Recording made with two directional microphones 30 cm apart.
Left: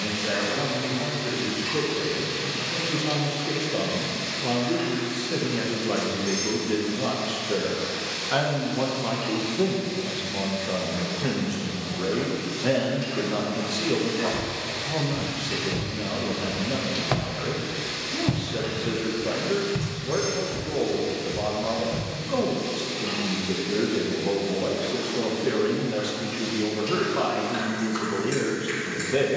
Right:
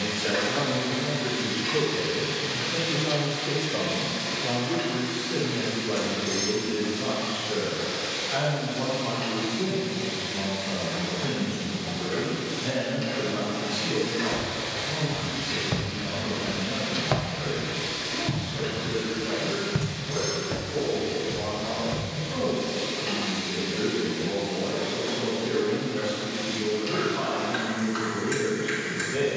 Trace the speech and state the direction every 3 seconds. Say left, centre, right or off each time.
centre, left, left, left, left, left, left, left, left, left.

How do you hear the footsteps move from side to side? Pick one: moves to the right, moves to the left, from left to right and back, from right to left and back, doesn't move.
from right to left and back.